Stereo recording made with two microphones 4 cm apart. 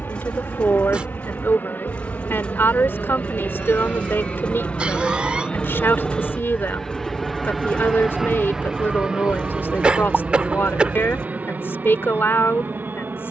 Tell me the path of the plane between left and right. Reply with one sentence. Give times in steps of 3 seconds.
You can hear the plane on the left from 0 s, in the centre from 6 s and on the right from 9 s.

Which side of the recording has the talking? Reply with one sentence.
In this clip you hear the talking on the left.